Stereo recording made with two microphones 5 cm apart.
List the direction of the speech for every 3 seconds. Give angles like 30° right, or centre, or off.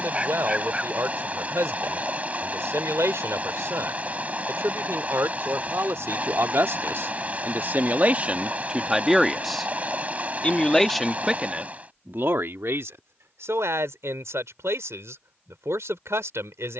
80° right, 80° right, 40° right, centre, 70° right, 80° right.